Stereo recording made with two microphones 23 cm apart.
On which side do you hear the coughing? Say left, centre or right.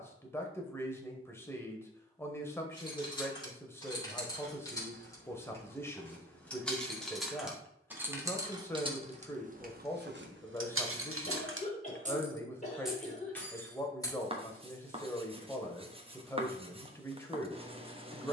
left.